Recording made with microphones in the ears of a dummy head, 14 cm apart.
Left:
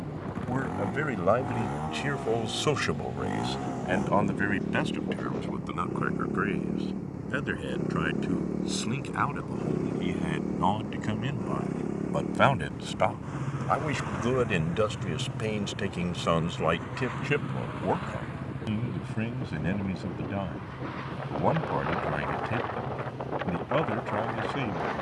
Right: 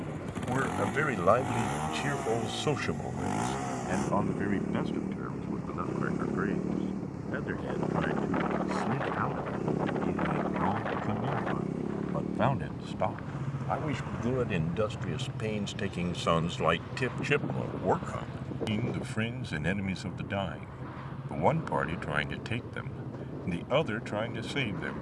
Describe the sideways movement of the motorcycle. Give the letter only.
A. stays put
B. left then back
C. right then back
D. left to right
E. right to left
E.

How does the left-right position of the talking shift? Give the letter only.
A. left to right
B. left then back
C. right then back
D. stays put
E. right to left
B.